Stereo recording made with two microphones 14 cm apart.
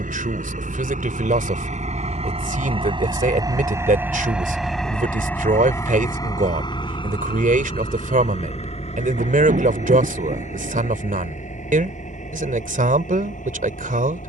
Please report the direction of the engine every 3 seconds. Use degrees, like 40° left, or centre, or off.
50° right, centre, 40° left, 50° left, 60° left.